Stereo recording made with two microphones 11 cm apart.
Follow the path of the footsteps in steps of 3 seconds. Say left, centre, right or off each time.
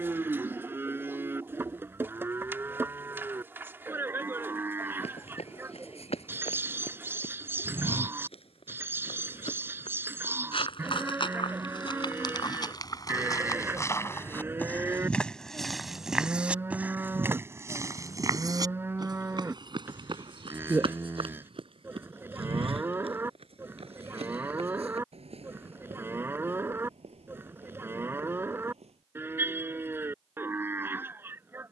off, left, left, left, left, centre, right, right, right, right, off.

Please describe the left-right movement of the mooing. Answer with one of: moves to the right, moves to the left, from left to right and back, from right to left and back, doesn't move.
doesn't move.